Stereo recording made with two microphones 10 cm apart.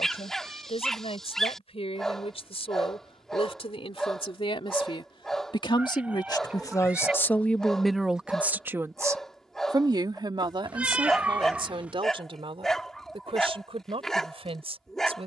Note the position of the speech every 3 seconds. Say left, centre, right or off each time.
left, left, centre, right, right.